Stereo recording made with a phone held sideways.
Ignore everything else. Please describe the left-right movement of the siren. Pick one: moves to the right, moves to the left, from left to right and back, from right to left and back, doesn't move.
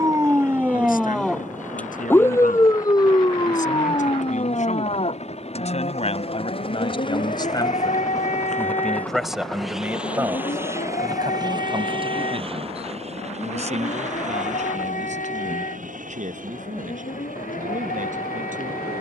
moves to the left.